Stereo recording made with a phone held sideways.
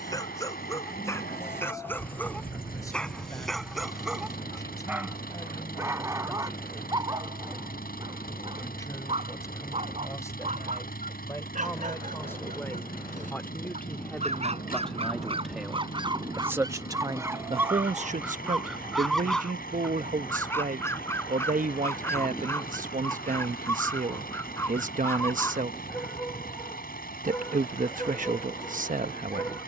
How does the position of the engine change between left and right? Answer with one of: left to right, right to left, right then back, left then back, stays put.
stays put.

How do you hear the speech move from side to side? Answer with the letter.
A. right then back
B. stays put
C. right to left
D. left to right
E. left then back
D.